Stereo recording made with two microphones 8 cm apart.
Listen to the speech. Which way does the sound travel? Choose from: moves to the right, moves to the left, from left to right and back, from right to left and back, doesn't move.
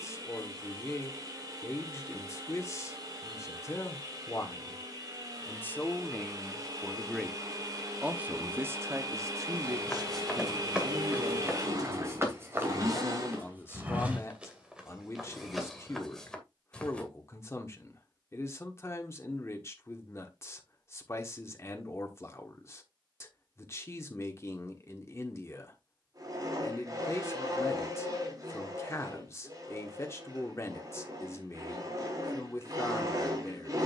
from left to right and back.